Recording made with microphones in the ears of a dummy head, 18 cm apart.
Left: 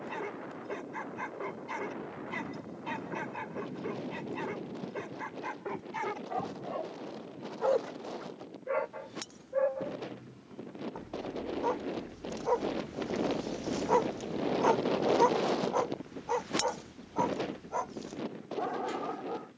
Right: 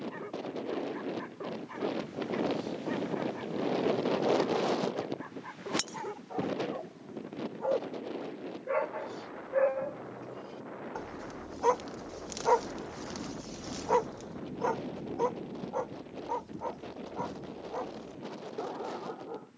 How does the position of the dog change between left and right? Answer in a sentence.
You can hear the dog go right and come back.